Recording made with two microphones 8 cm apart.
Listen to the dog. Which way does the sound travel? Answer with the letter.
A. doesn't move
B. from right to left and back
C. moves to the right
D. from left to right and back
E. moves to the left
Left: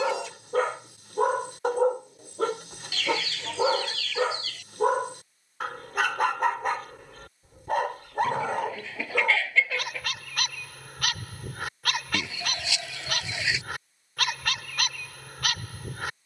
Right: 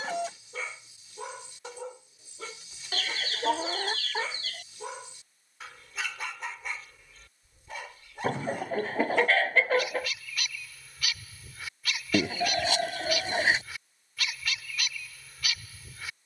A.